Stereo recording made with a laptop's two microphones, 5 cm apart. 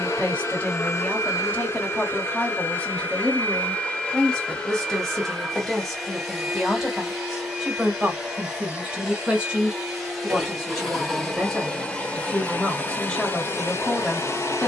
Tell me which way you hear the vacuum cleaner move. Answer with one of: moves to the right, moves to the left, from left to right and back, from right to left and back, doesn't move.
from left to right and back.